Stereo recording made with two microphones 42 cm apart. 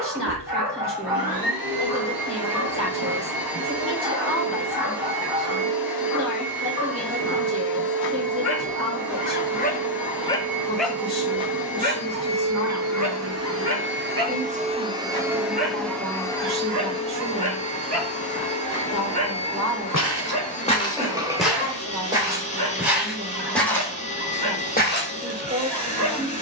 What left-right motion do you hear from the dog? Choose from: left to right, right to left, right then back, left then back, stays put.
left to right.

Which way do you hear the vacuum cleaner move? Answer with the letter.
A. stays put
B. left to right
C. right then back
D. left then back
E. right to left
E.